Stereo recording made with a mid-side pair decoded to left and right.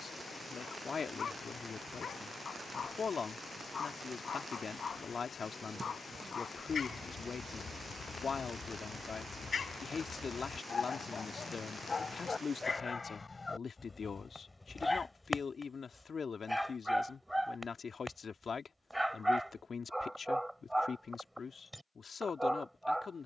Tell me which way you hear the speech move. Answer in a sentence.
You can hear the speech stay put.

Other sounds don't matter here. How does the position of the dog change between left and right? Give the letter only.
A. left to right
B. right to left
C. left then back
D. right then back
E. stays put
A.